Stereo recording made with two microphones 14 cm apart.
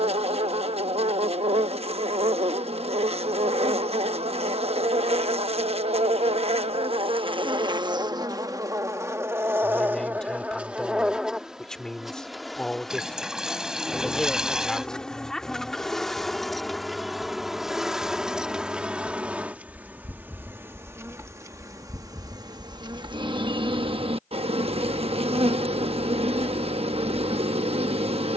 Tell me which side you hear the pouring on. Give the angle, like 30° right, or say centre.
10° right.